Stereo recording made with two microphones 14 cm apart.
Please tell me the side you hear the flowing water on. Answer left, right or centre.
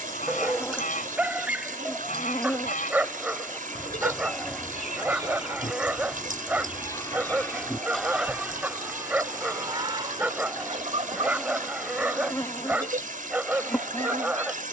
right.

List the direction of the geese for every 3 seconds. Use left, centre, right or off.
left, left, centre, right, right.